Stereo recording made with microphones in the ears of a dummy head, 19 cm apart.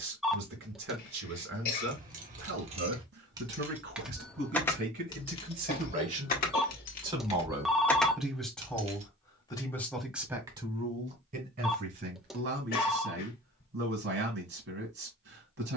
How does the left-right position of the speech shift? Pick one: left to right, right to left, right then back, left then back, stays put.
left then back.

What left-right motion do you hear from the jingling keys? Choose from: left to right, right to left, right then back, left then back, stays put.
left then back.